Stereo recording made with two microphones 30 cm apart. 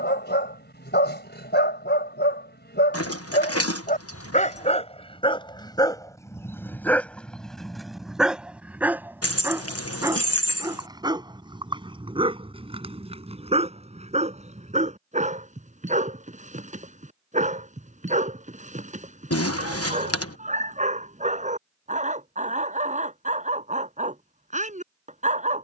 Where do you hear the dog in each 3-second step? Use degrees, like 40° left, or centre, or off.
40° left, 20° left, centre, 10° right, 20° right, 20° right, 20° right, 20° right, 20° right.